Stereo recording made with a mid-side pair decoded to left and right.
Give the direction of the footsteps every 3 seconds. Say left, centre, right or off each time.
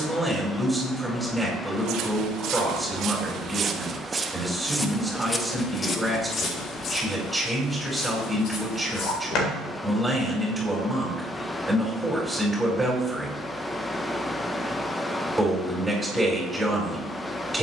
right, centre, left, left, off, off.